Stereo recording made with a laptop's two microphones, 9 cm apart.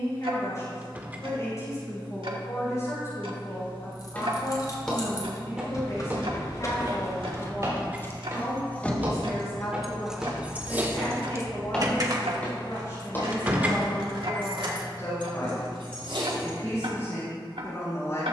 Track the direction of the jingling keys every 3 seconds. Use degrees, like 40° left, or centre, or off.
off, 50° left, 30° left, 20° right, 60° right, 80° right.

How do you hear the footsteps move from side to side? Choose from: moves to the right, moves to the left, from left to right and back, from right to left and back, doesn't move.
from left to right and back.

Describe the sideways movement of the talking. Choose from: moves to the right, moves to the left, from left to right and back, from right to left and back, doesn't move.
doesn't move.